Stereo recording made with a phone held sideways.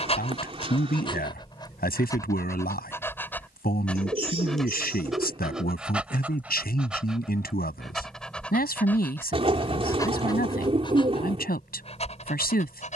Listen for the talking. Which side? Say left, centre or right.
left.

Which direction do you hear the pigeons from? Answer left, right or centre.
right.